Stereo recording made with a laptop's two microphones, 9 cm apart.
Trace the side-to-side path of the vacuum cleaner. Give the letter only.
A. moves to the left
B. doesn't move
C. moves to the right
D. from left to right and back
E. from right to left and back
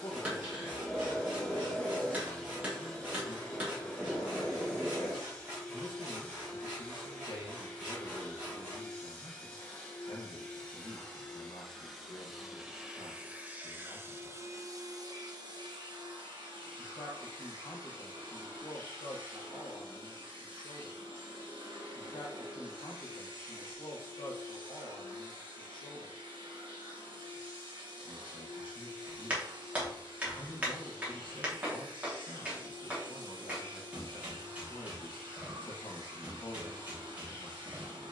C.